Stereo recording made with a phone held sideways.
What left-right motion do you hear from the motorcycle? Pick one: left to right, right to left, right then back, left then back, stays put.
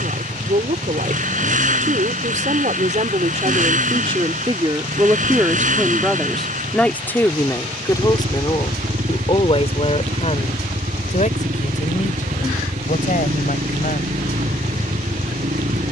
stays put.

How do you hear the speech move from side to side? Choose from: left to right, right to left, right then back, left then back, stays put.
right to left.